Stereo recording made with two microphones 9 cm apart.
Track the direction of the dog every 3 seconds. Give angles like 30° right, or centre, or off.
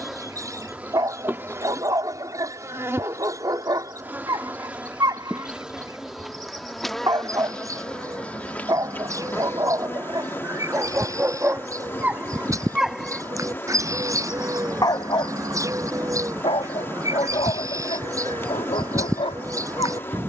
50° right, 50° right, 50° right, 40° right, centre, 70° left, 80° left.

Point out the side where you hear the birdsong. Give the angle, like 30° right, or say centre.
30° right.